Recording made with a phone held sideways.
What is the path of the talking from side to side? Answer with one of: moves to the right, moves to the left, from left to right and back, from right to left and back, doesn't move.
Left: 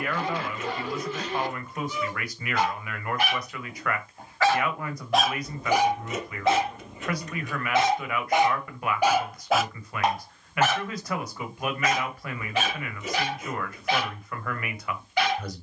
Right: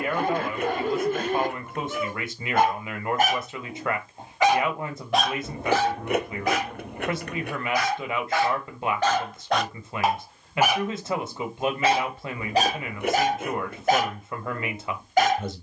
doesn't move.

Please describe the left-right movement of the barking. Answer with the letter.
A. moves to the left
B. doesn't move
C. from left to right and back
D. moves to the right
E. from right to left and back
E.